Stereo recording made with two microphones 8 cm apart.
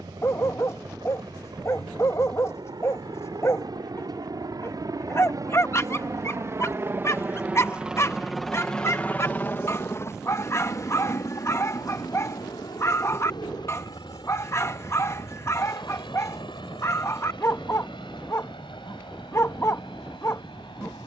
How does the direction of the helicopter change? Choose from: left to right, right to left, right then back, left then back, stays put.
right to left.